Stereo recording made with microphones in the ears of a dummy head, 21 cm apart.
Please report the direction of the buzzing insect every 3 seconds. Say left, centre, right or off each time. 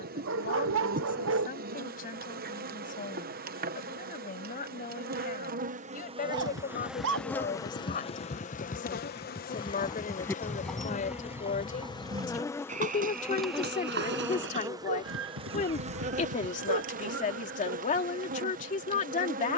right, right, centre, left, centre, right, right.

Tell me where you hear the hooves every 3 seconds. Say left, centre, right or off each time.
off, off, left, centre, right, right, off.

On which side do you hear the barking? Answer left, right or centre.
right.